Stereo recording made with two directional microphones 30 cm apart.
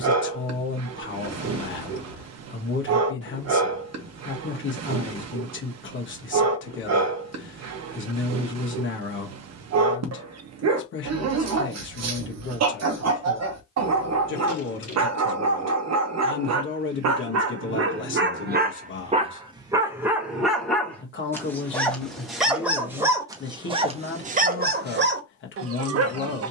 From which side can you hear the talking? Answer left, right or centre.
left.